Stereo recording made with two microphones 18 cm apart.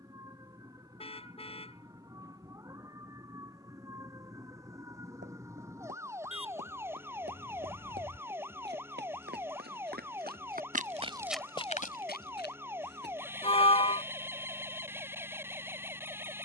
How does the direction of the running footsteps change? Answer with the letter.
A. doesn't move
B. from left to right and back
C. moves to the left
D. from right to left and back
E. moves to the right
C.